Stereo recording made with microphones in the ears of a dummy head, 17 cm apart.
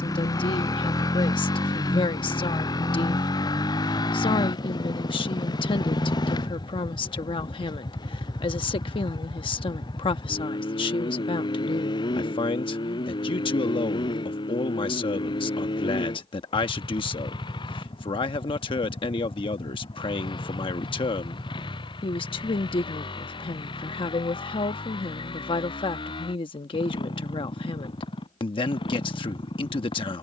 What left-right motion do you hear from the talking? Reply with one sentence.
You can hear the talking stay in one place.